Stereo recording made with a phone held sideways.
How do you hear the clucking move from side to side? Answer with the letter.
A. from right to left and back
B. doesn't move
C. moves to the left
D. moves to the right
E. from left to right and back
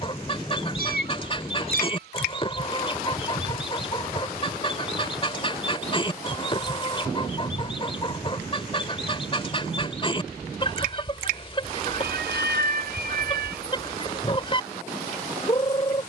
B.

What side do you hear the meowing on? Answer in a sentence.
In this clip you hear the meowing on the right.